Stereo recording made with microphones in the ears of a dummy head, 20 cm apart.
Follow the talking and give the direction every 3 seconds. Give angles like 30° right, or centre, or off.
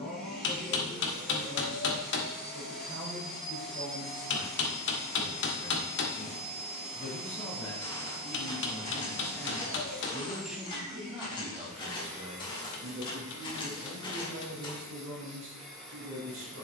40° left, 40° left, 30° left, 10° right, 40° right, 60° right.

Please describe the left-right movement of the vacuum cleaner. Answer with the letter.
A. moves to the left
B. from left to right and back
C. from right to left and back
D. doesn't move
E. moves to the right
D.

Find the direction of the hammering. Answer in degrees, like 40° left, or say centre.
60° left.